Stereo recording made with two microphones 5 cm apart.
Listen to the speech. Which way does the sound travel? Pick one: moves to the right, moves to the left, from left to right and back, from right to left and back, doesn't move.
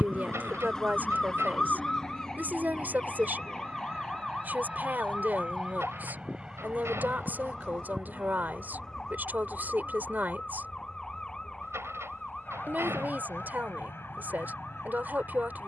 doesn't move.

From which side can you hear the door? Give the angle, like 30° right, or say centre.
60° right.